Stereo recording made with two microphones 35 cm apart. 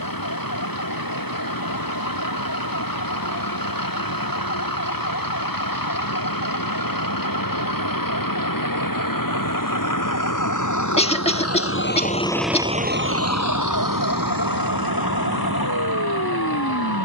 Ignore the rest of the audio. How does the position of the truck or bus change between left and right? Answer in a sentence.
You can hear the truck or bus go from the left side to the right.